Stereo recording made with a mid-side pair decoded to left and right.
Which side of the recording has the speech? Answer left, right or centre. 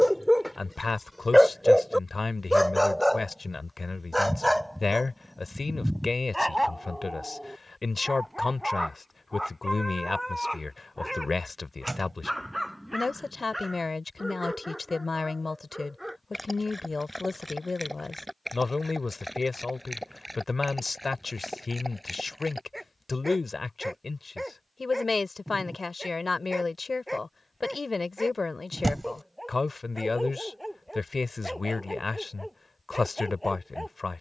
left.